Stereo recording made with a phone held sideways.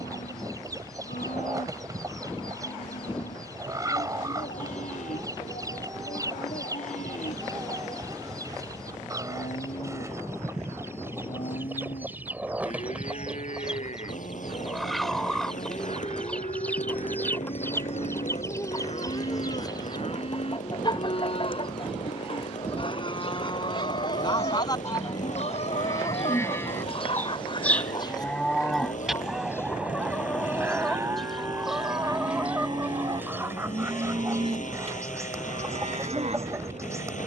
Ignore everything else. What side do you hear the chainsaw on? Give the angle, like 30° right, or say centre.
70° left.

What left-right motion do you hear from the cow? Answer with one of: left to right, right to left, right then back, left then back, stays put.
left to right.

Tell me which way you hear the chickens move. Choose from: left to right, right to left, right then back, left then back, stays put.
left then back.